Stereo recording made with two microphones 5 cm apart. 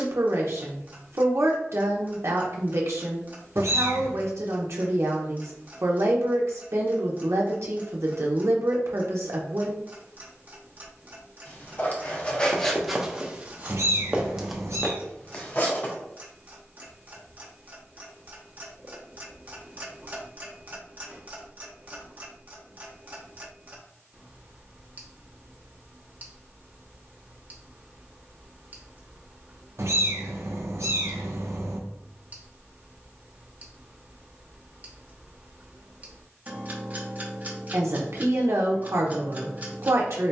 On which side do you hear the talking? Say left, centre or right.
right.